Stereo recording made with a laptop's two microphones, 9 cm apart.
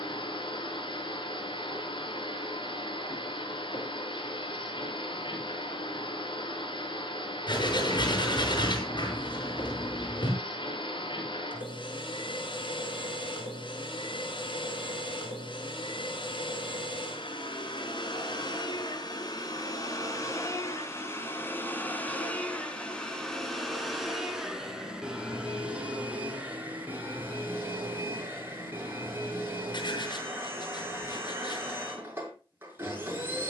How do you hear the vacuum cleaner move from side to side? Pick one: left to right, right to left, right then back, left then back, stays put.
left to right.